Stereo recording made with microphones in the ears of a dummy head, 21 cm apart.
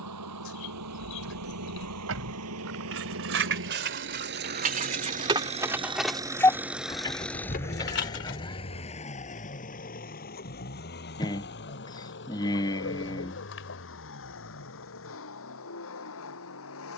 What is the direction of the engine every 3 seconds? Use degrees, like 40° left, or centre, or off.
70° right, 40° right, 10° left, 40° left, 50° left, 60° left.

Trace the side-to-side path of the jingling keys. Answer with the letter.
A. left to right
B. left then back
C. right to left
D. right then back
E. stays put
C.